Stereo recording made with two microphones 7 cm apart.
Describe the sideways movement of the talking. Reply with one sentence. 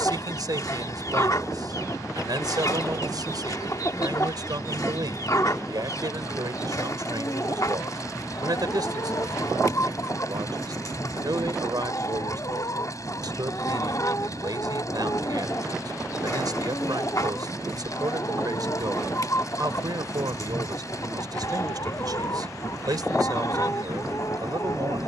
In this clip you hear the talking stay put.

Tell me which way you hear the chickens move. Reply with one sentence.
You can hear the chickens stay put.